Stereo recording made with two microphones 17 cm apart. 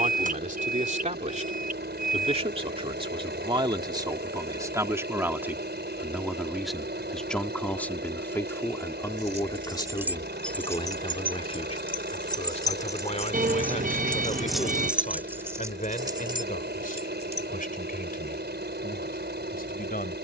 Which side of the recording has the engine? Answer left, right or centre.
right.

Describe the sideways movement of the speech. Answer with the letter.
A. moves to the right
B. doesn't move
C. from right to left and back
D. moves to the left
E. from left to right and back
D.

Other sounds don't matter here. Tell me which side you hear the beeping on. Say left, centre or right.
right.